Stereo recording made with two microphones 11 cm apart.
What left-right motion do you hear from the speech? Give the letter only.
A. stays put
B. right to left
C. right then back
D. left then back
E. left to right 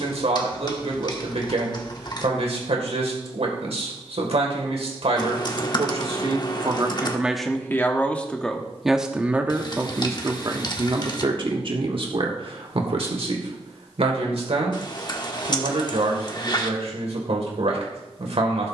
D.